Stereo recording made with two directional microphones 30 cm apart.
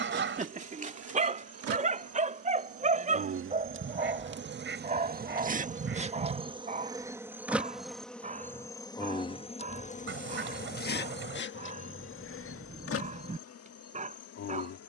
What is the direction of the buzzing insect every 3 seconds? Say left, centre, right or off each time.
right, right, centre, left, left.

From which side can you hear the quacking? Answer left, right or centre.
right.